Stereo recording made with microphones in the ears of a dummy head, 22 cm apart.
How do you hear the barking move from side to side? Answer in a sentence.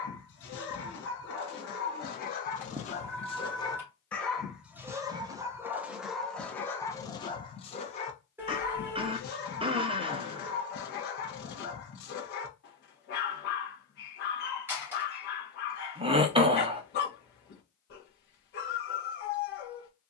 In this clip you hear the barking go right and come back.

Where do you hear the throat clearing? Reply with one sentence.
You can hear the throat clearing on the right.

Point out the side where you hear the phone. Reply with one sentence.
In this clip you hear the phone in the centre.